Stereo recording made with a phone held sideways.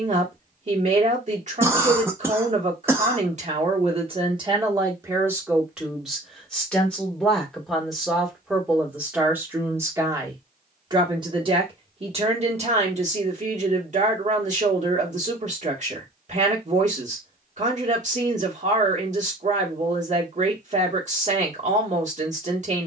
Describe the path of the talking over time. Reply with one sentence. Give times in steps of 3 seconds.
In this clip you hear the talking on the right from 0 s, in the centre from 6 s and on the right from 9 s.